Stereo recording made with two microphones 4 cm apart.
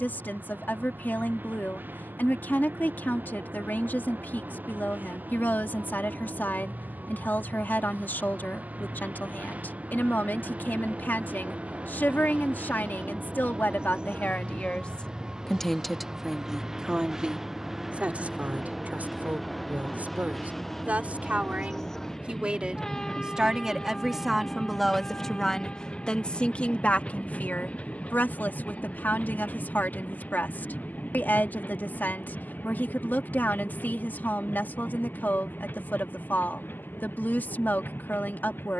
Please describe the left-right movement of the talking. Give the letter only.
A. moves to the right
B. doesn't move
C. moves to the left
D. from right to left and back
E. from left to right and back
E.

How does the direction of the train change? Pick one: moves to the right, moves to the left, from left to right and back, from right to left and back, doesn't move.
moves to the left.